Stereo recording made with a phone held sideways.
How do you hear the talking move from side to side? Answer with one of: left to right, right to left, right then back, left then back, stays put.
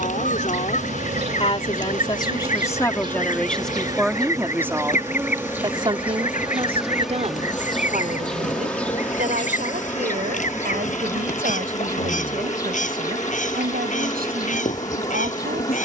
left to right.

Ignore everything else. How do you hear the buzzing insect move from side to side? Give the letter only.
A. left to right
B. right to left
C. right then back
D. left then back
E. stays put
B.